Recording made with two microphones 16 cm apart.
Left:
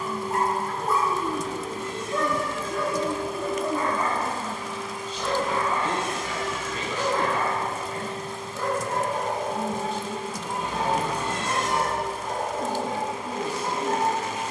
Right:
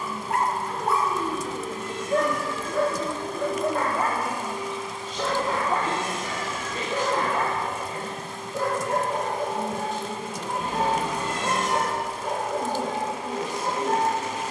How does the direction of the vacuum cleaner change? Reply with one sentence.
You can hear the vacuum cleaner go from the left side to the right.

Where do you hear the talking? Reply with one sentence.
You can hear the talking on the right.